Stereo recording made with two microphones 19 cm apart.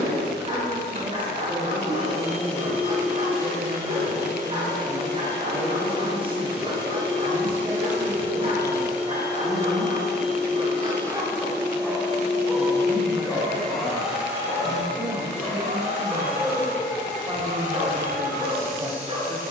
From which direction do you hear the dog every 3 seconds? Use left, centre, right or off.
right, right, right, right, centre, centre, right.